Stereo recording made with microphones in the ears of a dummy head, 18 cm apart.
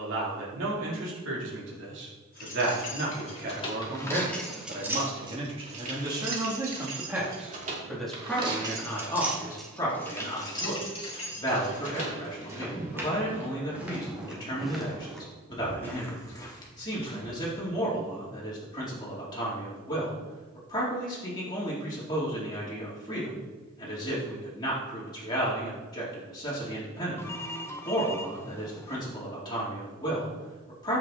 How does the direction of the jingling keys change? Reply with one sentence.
You can hear the jingling keys go right and come back.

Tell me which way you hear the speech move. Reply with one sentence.
You can hear the speech go from the right side to the left.